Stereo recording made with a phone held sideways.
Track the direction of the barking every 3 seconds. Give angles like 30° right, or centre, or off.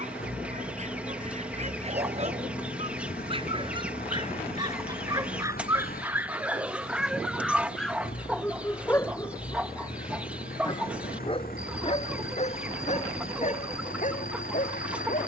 40° right, 20° right, centre, 30° left, 50° left.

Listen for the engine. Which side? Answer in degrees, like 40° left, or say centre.
70° left.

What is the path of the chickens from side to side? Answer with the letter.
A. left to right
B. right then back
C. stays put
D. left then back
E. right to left
C.